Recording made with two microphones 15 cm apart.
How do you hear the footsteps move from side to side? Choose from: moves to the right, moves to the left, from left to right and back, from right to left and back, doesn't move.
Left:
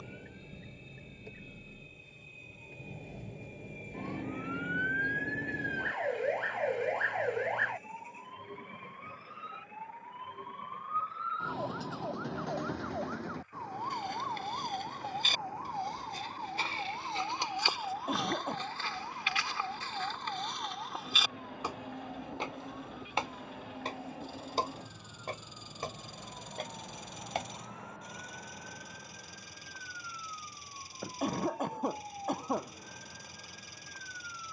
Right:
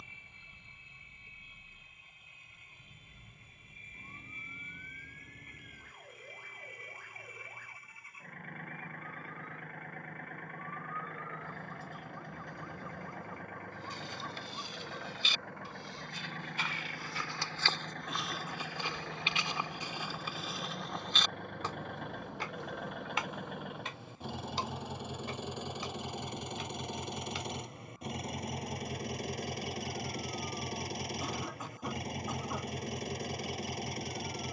from left to right and back.